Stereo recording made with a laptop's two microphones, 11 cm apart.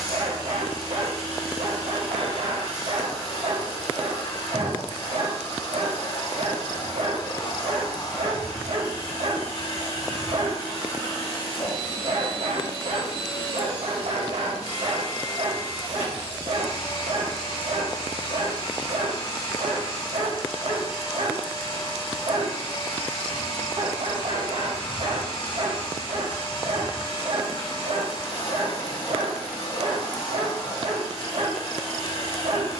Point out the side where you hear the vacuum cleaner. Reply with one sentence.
You can hear the vacuum cleaner on the left.